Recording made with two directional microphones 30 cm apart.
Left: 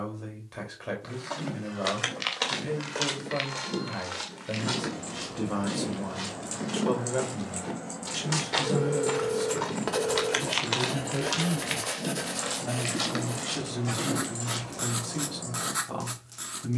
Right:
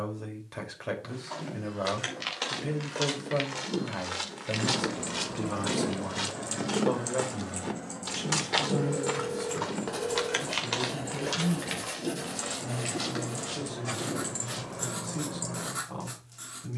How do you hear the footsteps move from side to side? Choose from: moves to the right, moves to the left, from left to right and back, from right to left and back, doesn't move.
from left to right and back.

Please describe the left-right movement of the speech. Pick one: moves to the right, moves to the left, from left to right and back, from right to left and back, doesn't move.
moves to the left.